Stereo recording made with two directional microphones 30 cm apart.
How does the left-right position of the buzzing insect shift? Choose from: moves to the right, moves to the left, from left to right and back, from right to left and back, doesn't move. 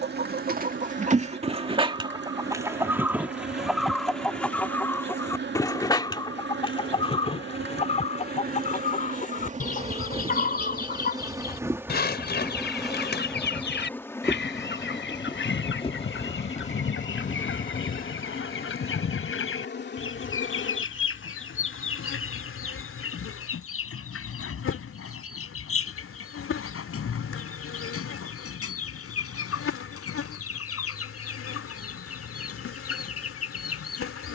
moves to the left.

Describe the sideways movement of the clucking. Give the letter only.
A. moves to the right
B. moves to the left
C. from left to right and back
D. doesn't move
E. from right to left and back
B.